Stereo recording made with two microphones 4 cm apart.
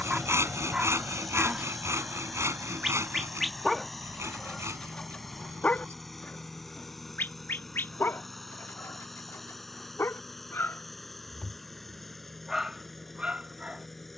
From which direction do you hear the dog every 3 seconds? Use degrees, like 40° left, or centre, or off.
20° right, 20° left, 50° left, 60° left, 20° right.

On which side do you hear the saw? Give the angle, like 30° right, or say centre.
80° right.